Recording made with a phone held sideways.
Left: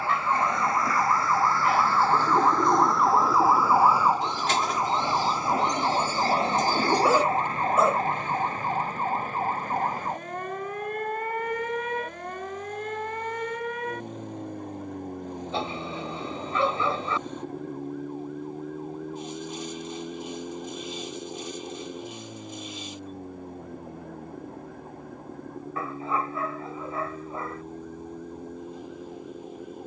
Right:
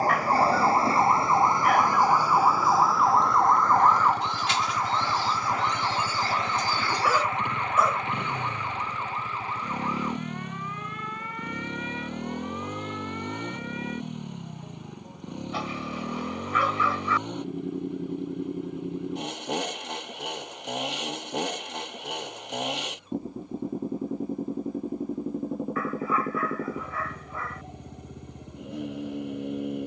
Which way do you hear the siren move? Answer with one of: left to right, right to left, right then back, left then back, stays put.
right to left.